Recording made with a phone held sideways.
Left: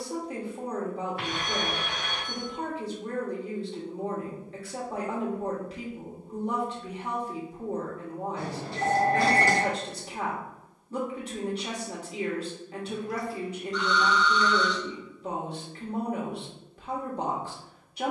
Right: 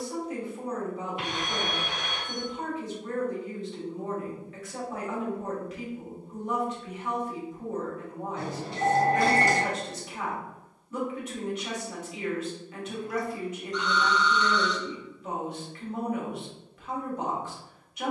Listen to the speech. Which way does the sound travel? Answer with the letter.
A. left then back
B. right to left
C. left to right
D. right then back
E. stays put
E.